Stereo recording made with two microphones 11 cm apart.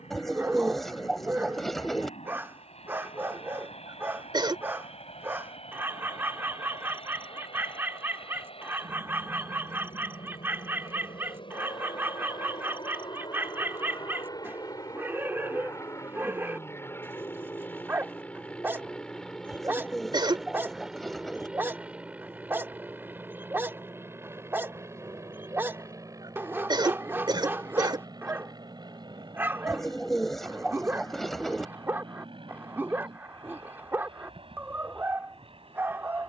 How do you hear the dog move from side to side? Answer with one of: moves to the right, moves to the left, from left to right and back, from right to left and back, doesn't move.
doesn't move.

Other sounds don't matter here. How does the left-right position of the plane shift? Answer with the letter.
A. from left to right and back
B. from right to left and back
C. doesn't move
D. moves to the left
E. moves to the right
E.